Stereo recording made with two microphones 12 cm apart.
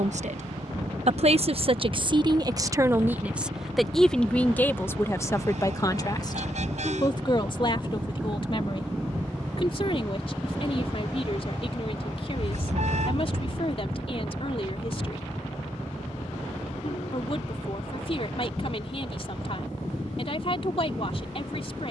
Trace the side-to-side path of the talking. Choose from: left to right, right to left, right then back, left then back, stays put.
right to left.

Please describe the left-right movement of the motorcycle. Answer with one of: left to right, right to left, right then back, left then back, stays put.
right to left.